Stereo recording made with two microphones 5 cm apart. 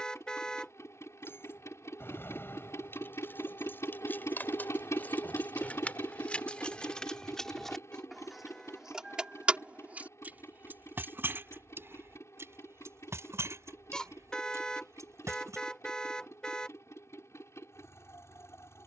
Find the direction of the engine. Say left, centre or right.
left.